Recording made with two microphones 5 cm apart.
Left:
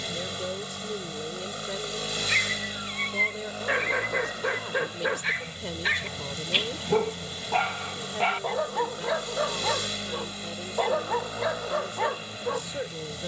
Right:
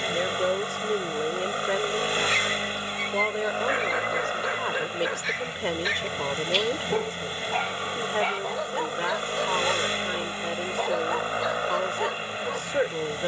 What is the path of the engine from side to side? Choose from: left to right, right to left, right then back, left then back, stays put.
stays put.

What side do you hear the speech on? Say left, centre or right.
right.